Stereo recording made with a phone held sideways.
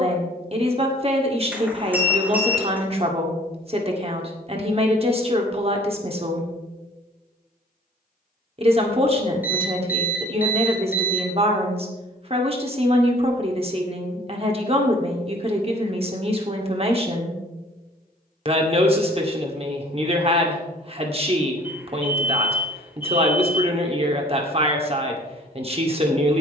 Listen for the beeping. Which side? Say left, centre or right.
centre.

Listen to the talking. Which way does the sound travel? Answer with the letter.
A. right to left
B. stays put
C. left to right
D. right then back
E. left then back
B.